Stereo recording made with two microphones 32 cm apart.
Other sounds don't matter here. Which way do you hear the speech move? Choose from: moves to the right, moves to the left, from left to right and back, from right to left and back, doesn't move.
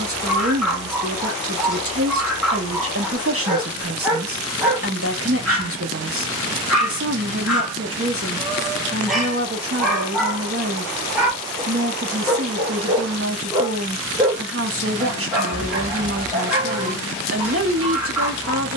doesn't move.